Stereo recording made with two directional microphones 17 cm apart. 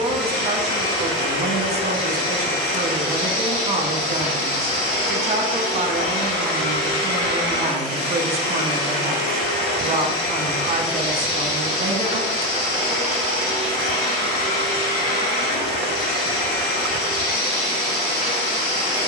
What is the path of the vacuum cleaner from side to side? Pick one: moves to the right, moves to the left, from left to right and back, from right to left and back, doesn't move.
doesn't move.